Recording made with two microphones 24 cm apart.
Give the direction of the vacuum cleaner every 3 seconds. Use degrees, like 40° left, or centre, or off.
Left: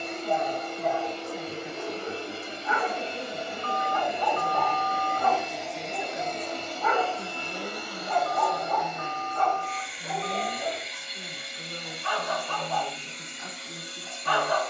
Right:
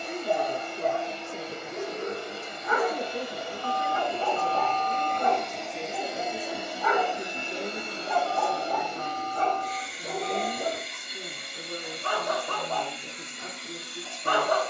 40° left, 10° left, 20° right, 50° right, 60° right.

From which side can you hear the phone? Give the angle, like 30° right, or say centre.
40° left.